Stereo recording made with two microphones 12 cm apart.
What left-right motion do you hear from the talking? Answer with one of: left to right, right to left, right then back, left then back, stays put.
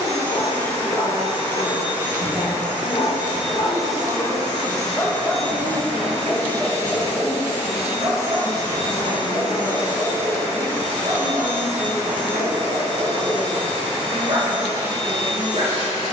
right to left.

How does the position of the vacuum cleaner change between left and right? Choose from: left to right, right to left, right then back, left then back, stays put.
right to left.